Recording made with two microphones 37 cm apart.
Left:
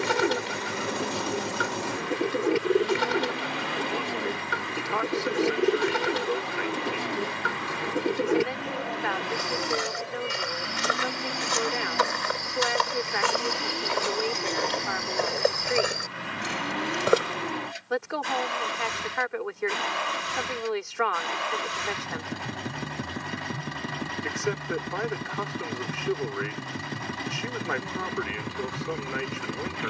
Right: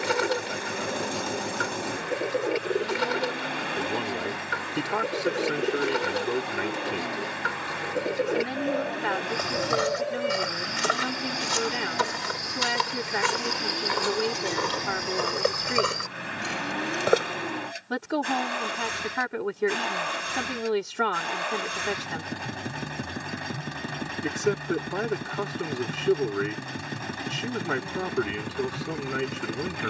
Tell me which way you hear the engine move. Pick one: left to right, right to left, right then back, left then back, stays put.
stays put.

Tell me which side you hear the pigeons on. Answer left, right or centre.
left.